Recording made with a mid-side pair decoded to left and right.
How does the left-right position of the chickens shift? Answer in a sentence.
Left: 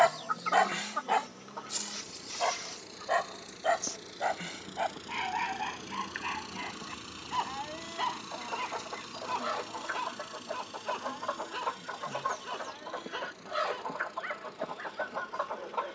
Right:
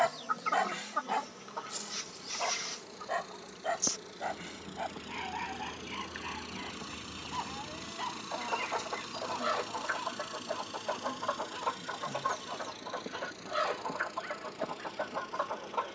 You can hear the chickens go right and come back.